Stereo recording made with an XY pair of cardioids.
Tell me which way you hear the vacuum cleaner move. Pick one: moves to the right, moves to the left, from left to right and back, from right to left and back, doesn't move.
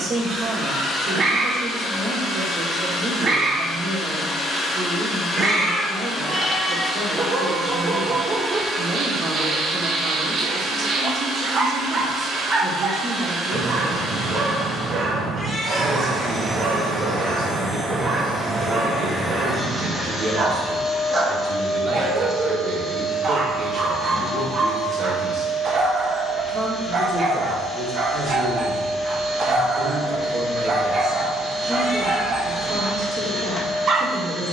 from left to right and back.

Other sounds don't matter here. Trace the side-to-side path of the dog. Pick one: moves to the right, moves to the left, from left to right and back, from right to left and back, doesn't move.
doesn't move.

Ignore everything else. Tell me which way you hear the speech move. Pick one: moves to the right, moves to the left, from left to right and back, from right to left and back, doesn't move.
doesn't move.